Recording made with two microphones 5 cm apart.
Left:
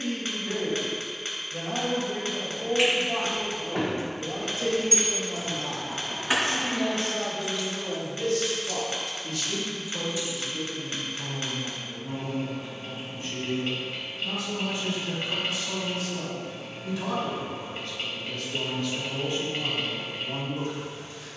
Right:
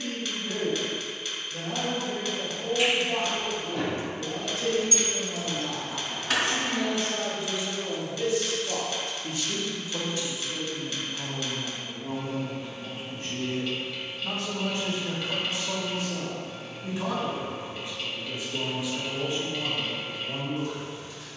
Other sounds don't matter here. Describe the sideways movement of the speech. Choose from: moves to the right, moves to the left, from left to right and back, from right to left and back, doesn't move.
from left to right and back.